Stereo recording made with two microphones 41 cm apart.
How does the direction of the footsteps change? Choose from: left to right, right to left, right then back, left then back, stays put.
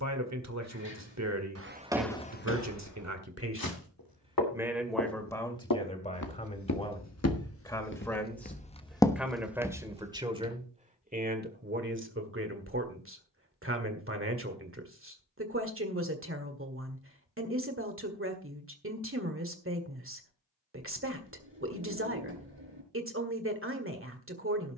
left then back.